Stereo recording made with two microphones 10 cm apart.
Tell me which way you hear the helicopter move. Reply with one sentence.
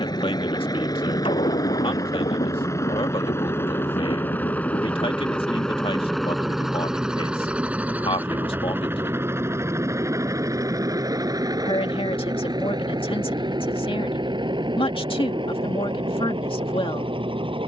In this clip you hear the helicopter go from the left side to the right.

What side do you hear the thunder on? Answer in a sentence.
You can hear the thunder on the left.